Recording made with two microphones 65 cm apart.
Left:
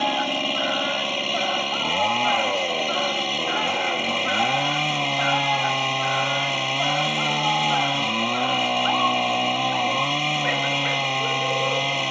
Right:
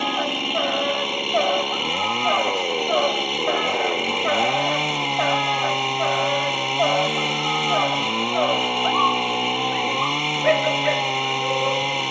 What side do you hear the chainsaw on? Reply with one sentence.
You can hear the chainsaw in the centre.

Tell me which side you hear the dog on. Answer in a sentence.
In this clip you hear the dog in the centre.